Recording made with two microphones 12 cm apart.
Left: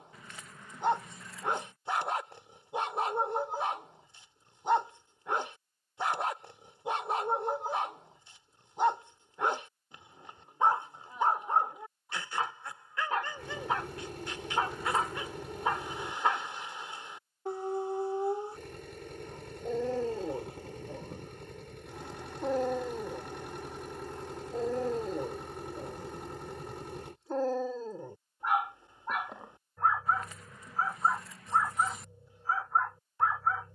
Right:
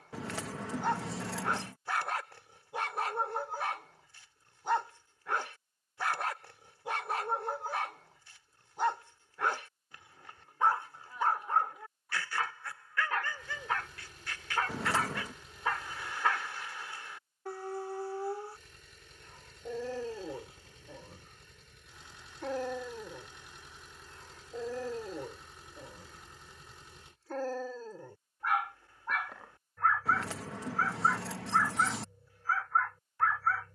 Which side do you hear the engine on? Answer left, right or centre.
left.